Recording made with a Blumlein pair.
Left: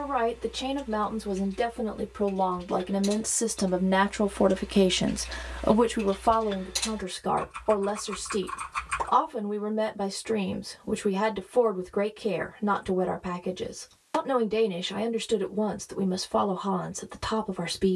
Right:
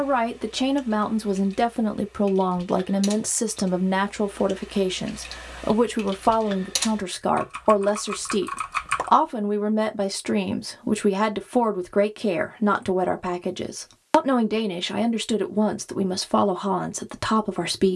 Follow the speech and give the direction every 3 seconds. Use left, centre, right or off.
right, centre, right, right, right, right.